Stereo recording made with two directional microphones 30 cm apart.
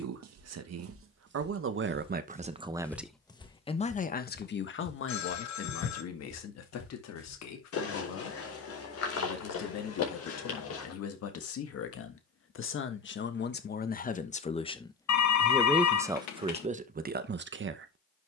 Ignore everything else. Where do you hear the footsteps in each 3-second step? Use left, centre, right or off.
right, left, left, left, off, off.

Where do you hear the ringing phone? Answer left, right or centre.
left.